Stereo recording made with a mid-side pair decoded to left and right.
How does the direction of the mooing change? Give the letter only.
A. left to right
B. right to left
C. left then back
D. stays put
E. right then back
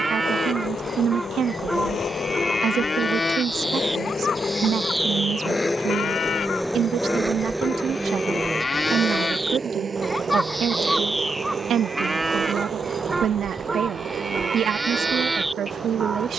C.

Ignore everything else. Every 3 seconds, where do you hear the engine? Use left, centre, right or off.
left, left, centre, right, right, right.